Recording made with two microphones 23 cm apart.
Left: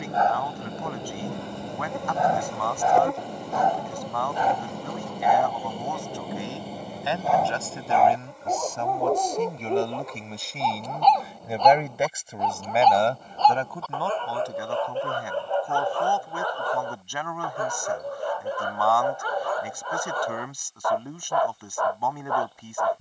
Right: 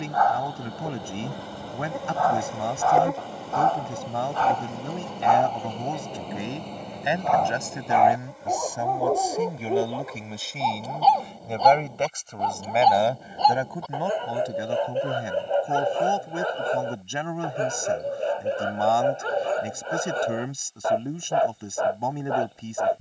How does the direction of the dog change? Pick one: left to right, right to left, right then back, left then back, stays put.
left to right.